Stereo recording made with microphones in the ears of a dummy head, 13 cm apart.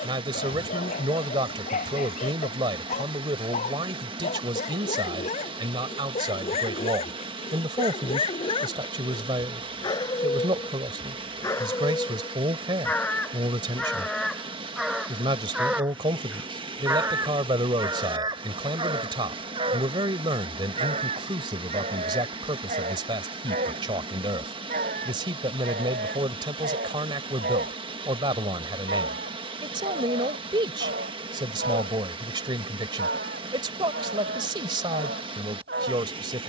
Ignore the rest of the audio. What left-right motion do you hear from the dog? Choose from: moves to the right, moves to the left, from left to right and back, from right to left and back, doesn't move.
moves to the right.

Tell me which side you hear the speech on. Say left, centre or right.
right.